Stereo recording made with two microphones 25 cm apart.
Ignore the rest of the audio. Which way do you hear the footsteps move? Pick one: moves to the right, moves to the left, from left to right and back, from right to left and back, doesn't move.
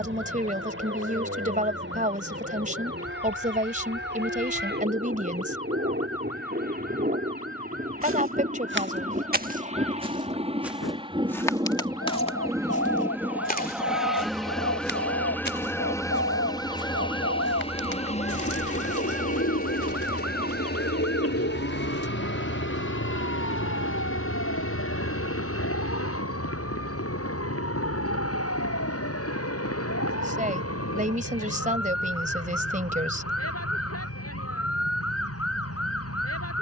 moves to the left.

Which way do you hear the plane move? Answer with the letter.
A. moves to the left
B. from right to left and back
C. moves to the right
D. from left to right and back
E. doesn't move
A.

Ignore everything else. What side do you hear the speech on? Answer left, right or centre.
right.